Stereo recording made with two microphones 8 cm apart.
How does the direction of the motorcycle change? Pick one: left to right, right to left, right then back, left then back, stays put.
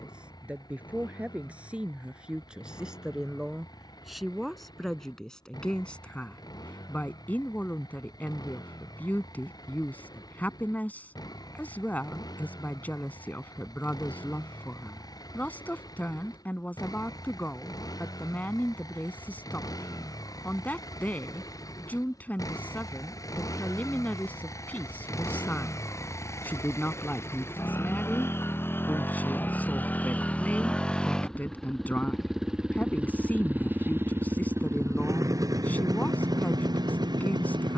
left to right.